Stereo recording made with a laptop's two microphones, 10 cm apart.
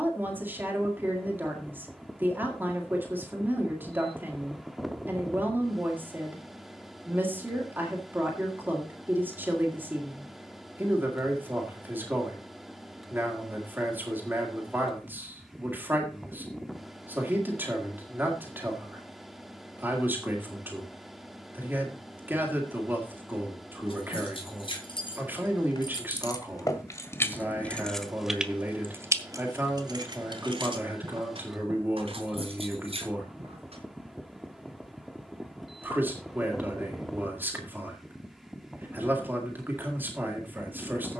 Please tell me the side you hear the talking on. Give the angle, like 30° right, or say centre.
20° right.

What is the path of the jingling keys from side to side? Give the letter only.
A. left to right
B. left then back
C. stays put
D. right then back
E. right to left
A.